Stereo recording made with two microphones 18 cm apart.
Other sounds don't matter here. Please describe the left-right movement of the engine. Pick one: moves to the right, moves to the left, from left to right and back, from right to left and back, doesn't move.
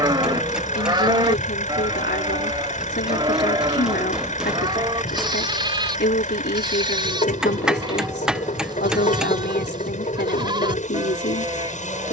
doesn't move.